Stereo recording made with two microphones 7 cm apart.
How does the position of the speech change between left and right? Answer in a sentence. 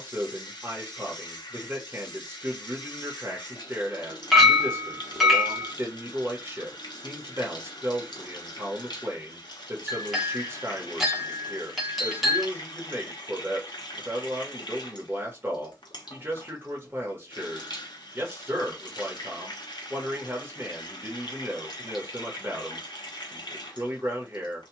You can hear the speech stay put.